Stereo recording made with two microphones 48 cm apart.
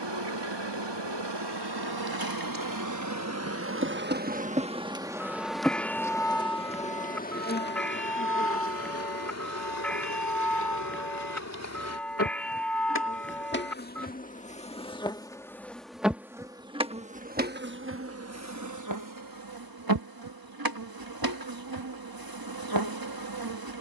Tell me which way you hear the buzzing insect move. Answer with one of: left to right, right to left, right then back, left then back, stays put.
left then back.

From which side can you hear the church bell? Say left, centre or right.
centre.